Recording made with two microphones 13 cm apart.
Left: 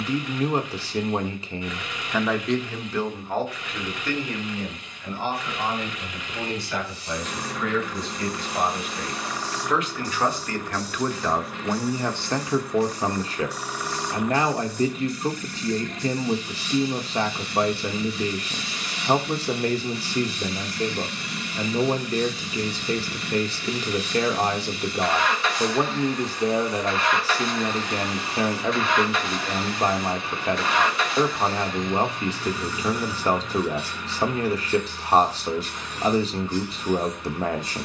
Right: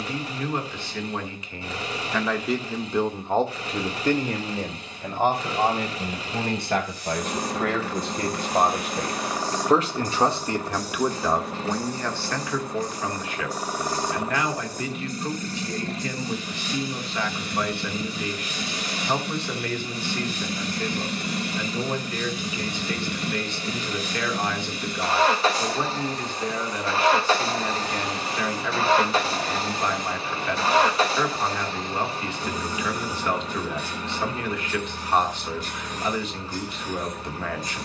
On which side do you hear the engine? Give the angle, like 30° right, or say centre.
30° right.